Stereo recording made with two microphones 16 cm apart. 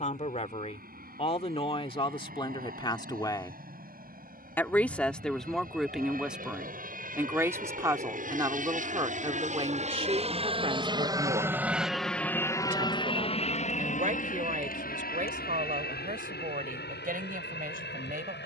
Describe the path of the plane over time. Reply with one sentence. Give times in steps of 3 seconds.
You can hear the plane on the right from 0 s and on the left from 12 s.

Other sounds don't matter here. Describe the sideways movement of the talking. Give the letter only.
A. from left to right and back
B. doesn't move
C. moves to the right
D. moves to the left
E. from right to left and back
C.